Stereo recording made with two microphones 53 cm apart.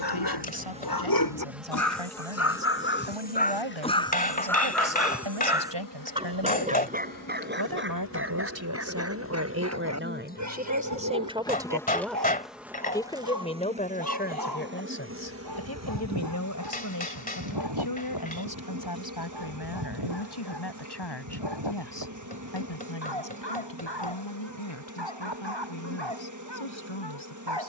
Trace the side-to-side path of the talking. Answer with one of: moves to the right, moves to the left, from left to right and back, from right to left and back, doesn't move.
moves to the left.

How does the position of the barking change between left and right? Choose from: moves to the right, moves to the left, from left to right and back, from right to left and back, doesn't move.
moves to the right.